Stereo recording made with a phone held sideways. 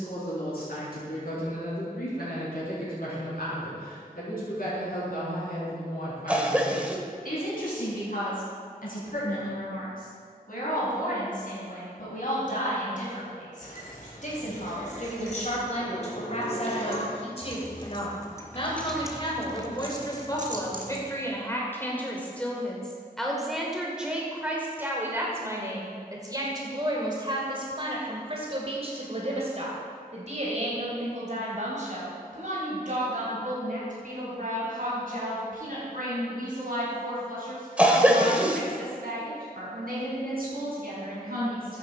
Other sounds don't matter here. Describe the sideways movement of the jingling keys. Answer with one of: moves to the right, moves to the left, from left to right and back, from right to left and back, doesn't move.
moves to the right.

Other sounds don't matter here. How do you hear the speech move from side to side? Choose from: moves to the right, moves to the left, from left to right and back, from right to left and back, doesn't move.
moves to the right.